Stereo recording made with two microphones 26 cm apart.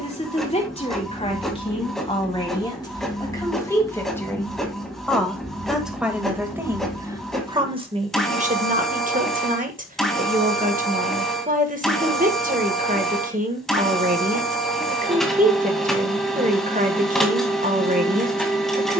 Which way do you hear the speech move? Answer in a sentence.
You can hear the speech move to the right.